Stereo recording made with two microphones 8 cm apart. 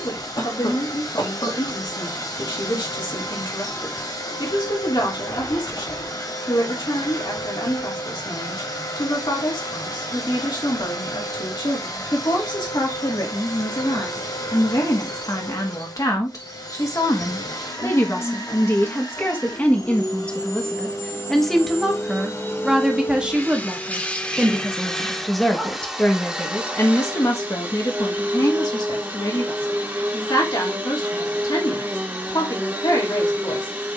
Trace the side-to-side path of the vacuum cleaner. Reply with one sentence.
In this clip you hear the vacuum cleaner travel towards the right.